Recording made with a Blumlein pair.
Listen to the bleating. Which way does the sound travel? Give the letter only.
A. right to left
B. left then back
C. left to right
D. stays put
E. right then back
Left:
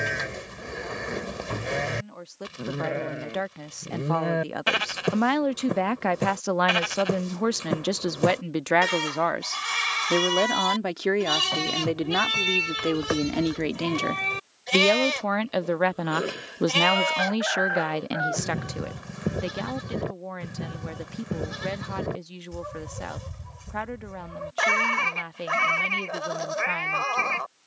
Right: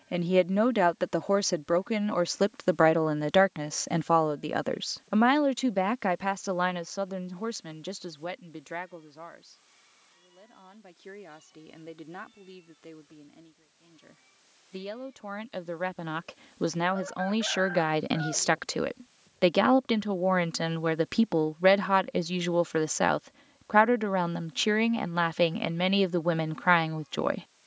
D.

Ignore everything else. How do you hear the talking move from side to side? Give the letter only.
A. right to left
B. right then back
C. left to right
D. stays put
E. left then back
E.